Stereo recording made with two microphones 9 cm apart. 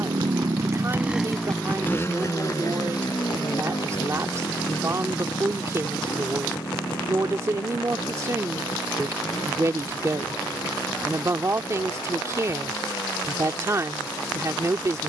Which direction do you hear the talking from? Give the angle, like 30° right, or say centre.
40° right.